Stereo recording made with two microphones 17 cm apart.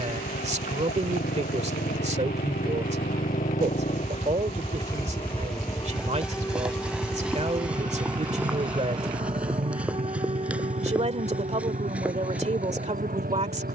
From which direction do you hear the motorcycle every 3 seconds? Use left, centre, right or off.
left, left, right, right, right.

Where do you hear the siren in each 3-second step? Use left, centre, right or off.
left, left, centre, right, right.